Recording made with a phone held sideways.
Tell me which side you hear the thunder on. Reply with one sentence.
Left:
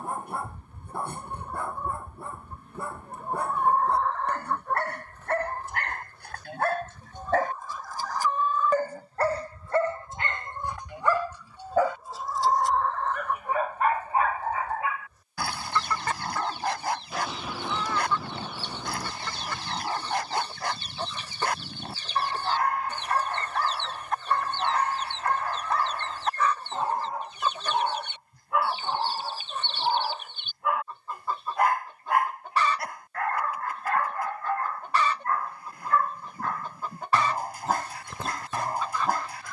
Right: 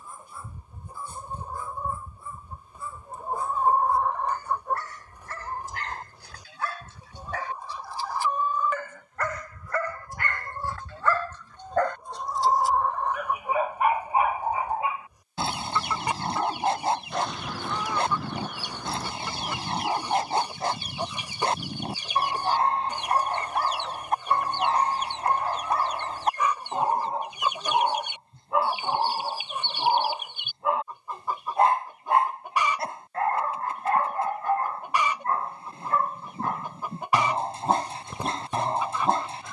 In this clip you hear the thunder in the centre.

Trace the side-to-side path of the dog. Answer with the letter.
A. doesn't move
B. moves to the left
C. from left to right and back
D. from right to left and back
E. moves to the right
E.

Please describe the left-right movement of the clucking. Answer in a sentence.
You can hear the clucking stay in one place.